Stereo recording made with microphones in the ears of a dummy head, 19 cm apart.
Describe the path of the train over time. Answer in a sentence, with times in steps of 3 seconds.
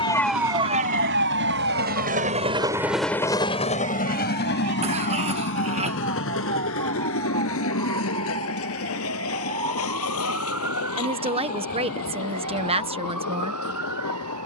In this clip you hear the train on the right from 0 s and on the left from 3 s.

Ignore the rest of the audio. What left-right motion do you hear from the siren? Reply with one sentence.
You can hear the siren move from left to right.